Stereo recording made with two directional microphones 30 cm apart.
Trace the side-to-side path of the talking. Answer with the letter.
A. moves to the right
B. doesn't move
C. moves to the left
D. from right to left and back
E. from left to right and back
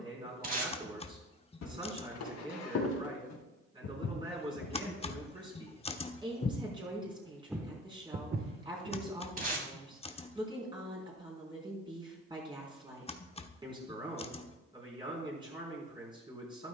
B.